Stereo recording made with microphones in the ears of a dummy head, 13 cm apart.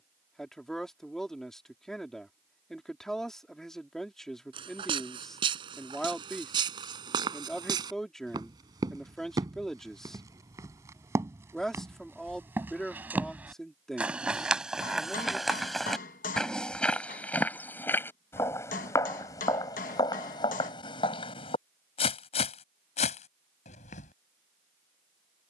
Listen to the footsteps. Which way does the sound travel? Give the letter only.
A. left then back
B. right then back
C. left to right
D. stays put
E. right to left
E.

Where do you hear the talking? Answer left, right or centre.
centre.